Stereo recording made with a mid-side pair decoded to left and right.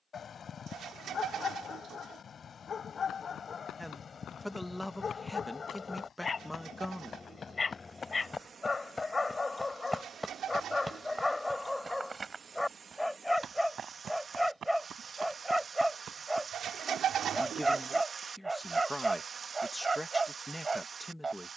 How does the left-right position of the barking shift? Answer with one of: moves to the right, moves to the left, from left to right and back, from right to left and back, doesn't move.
moves to the right.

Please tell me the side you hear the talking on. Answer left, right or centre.
centre.